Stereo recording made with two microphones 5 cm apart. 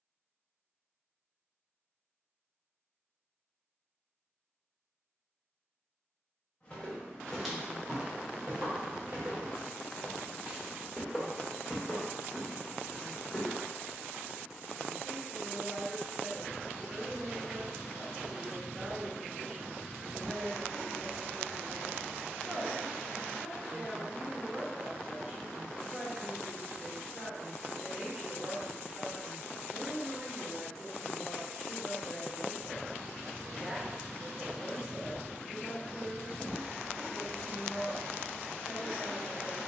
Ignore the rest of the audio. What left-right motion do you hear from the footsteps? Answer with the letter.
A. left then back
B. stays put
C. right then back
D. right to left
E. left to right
C.